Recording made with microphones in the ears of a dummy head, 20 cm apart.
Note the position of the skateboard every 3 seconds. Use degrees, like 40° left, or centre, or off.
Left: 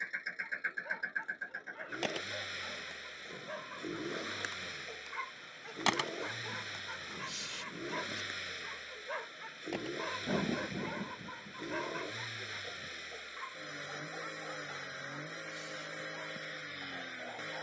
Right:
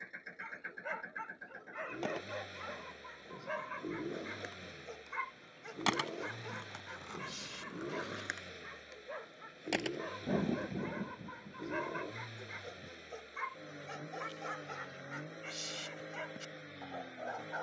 80° left, 50° left, 20° right, 50° right, off, off.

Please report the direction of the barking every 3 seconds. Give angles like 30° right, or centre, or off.
30° right, 10° right, 20° left, 20° left, 20° right, 40° right.